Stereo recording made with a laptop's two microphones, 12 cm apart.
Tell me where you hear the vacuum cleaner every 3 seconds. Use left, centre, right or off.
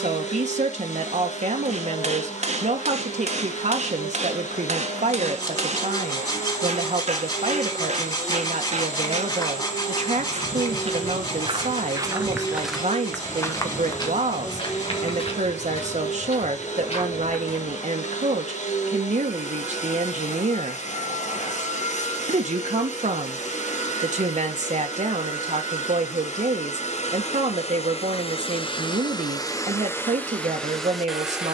left, left, left, left, left, left, left, left, left, left, centre.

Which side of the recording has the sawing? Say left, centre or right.
left.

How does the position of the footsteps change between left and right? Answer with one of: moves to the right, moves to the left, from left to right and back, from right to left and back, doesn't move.
moves to the left.